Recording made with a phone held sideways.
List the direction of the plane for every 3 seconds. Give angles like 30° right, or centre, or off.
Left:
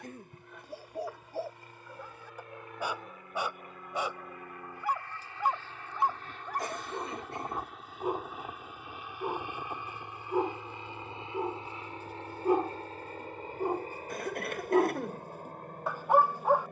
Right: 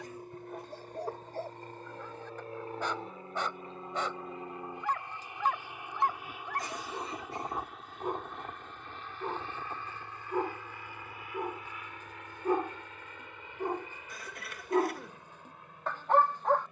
40° right, 20° right, centre, 20° left, 40° left, 40° left.